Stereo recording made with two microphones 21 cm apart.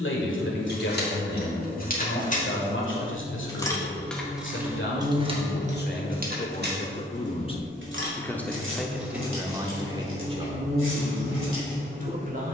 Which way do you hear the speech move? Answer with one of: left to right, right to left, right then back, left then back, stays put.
left to right.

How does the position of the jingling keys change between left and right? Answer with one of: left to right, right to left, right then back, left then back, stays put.
left to right.